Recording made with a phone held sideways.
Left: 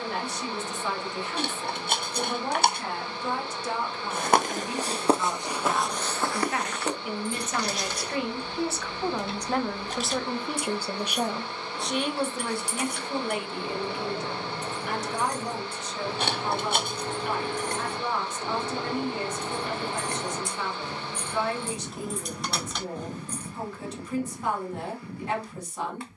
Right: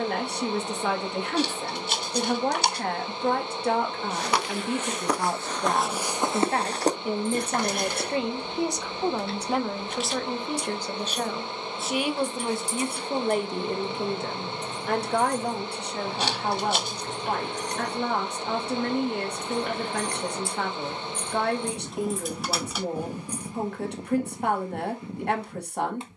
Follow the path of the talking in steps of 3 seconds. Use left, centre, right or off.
right, right, right, centre, right, right, right, right, right.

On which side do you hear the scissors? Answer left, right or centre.
left.